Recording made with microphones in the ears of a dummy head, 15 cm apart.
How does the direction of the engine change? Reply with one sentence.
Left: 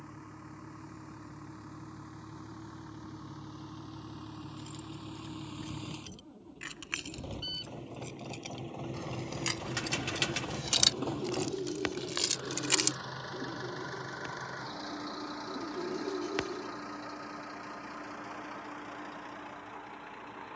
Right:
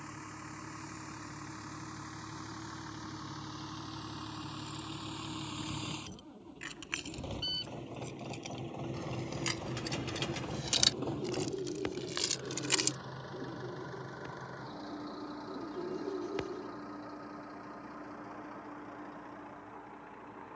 In this clip you hear the engine go from the right side to the left.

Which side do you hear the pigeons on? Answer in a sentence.
In this clip you hear the pigeons on the left.